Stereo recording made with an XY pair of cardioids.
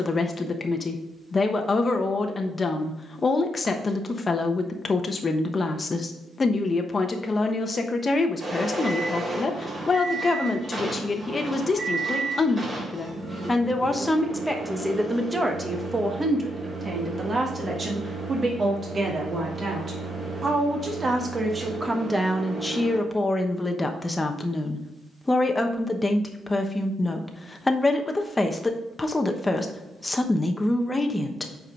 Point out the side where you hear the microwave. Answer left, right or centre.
right.